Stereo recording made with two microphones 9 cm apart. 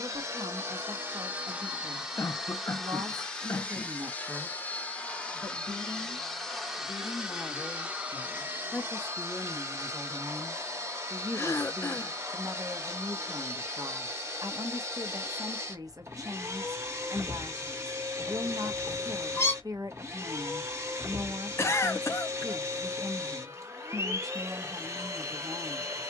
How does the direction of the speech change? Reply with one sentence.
You can hear the speech go left and come back.